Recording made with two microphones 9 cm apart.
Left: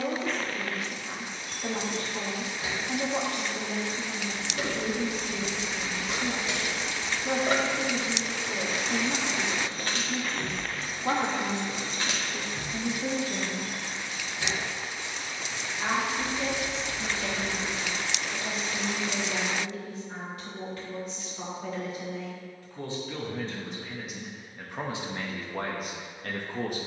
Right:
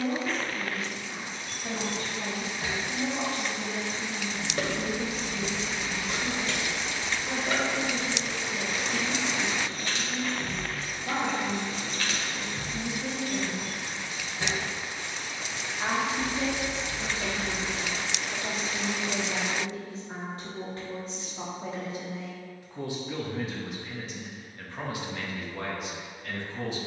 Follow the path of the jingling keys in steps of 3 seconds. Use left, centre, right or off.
right, right, left, left, centre, right, off, off, off.